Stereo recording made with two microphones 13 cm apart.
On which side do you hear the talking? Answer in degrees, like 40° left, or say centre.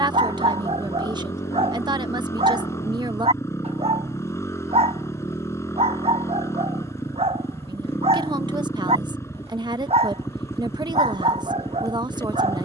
30° right.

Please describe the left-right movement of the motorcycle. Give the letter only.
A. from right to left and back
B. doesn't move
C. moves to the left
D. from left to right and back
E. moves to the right
B.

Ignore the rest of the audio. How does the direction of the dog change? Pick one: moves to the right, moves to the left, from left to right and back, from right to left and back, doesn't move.
doesn't move.